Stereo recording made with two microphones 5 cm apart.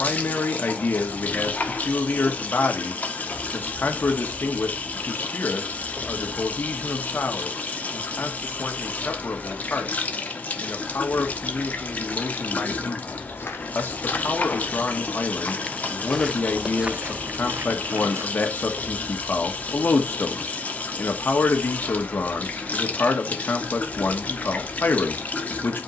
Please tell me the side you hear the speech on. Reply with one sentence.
In this clip you hear the speech on the left.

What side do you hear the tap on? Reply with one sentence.
In this clip you hear the tap on the left.